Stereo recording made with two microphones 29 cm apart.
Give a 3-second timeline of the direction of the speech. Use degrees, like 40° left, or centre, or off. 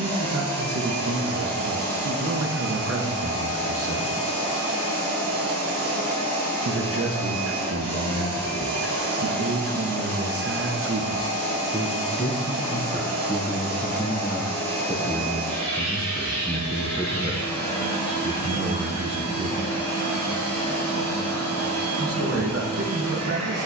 50° right, 50° right, 50° right, 40° right, 20° left, centre, 40° right, 50° right.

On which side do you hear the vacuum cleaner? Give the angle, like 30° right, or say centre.
60° right.